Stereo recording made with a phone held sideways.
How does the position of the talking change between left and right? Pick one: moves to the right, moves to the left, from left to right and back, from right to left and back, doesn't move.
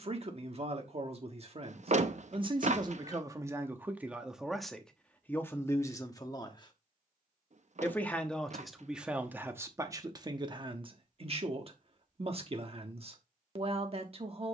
from right to left and back.